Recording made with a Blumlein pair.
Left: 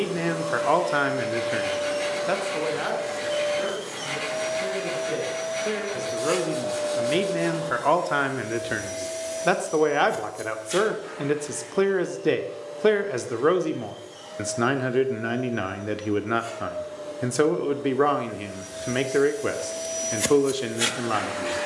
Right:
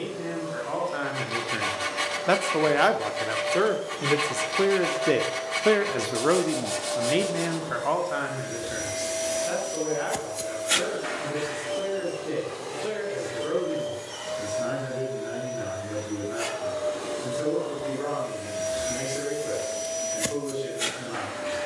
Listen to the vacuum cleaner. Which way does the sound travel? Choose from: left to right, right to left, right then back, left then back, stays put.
right then back.